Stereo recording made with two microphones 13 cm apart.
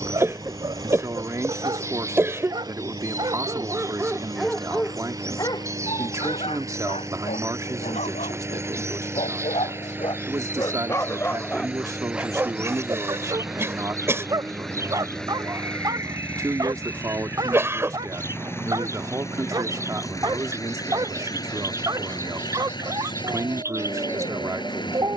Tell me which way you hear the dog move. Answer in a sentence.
You can hear the dog move from right to left and back again.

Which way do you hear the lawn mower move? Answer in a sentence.
You can hear the lawn mower travel towards the left.